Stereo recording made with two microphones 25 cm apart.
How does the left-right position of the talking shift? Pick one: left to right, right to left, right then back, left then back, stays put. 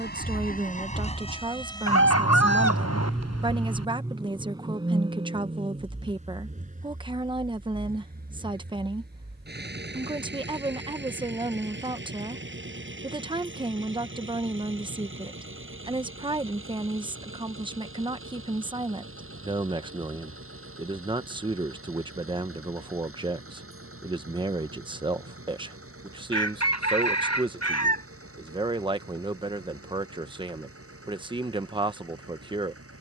stays put.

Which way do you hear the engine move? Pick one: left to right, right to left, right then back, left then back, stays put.
left to right.